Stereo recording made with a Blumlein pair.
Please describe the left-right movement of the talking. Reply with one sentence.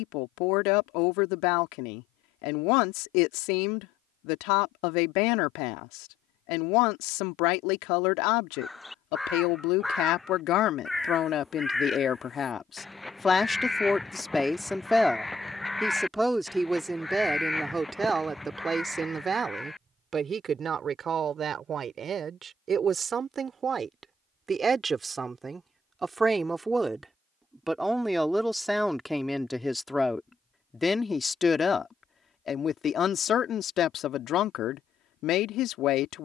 In this clip you hear the talking go right and come back.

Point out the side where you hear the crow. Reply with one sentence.
You can hear the crow in the centre.